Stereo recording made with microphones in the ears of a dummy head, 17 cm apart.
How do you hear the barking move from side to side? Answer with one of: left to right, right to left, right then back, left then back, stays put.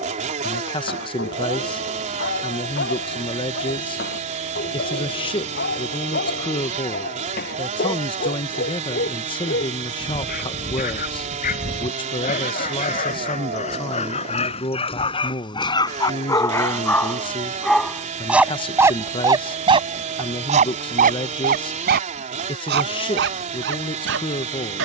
left to right.